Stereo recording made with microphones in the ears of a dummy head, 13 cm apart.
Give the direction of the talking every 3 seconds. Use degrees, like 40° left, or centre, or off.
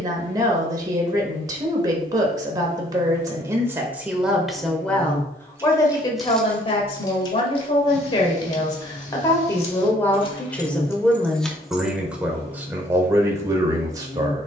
30° right, centre, 40° left, 10° left, 20° right.